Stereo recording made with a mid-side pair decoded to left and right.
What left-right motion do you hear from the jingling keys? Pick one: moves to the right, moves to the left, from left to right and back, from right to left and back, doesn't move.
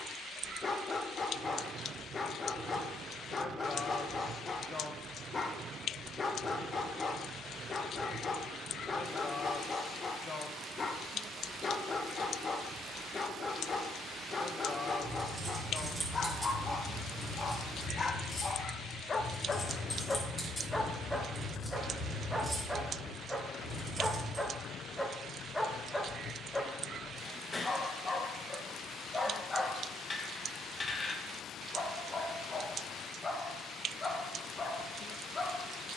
from right to left and back.